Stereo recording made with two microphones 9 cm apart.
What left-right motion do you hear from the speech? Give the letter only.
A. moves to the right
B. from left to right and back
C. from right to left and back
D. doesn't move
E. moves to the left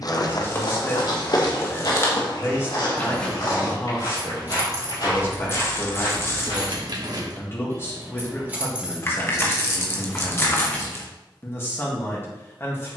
D.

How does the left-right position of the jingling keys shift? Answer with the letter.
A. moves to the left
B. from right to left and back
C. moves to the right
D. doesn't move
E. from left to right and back
E.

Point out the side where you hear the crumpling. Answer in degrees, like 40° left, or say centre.
30° left.